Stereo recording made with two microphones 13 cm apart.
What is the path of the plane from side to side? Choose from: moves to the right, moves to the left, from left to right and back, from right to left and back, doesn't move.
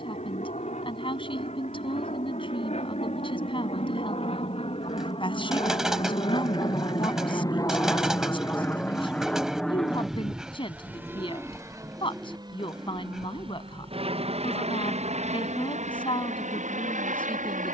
moves to the right.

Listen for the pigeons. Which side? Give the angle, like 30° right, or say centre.
centre.